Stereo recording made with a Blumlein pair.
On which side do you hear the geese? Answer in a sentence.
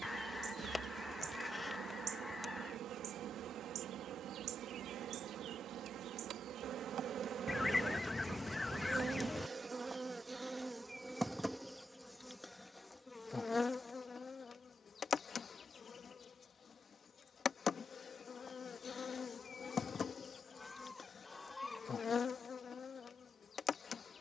You can hear the geese in the centre.